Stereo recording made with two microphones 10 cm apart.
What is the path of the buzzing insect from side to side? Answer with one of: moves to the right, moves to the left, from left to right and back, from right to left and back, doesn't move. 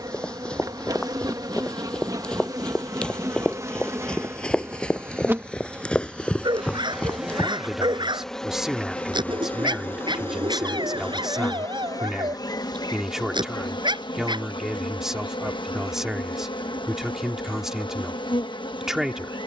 moves to the left.